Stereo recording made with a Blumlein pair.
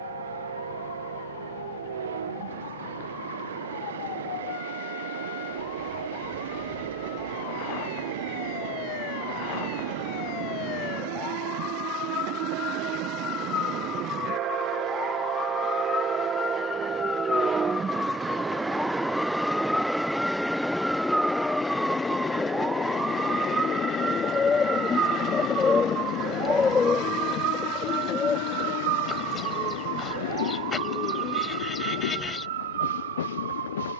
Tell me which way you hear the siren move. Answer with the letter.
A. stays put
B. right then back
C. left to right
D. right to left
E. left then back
C.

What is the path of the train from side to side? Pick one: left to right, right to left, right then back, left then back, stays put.
right to left.